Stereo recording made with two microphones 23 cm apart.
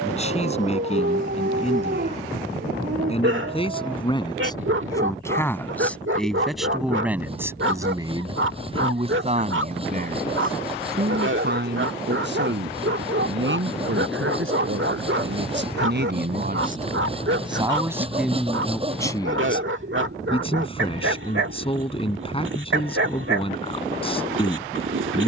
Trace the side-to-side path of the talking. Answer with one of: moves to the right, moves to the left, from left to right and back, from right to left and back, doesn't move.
from left to right and back.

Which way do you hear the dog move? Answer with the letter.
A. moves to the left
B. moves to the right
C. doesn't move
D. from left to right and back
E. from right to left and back
C.